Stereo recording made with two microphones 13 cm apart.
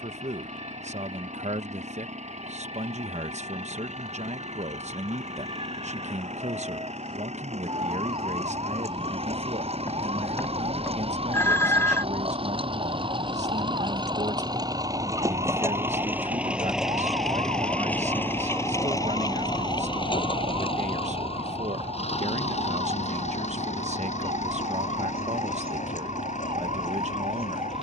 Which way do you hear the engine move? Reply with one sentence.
In this clip you hear the engine move to the left.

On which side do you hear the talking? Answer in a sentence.
In this clip you hear the talking on the right.